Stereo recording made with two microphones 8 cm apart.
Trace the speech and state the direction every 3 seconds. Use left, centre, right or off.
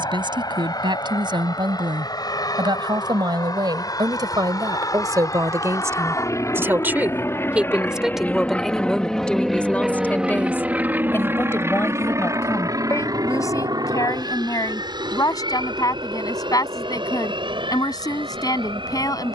right, right, centre, left, left, left, left.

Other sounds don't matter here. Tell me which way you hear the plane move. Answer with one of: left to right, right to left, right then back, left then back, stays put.
left to right.